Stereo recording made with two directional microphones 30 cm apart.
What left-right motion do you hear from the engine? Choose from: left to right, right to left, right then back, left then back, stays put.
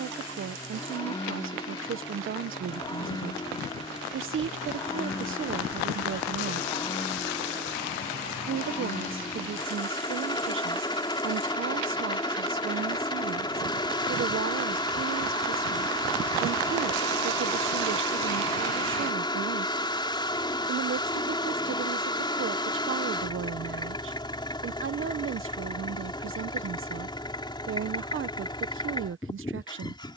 stays put.